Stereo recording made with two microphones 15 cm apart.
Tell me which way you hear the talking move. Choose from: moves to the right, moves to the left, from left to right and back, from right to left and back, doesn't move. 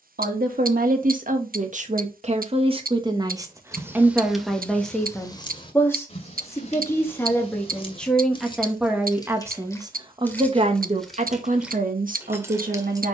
from right to left and back.